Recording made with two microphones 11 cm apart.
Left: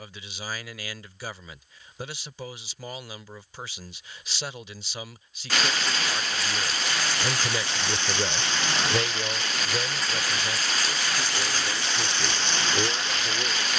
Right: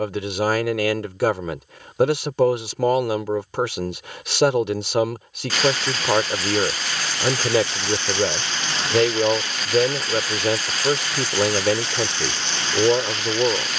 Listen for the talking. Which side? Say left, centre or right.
right.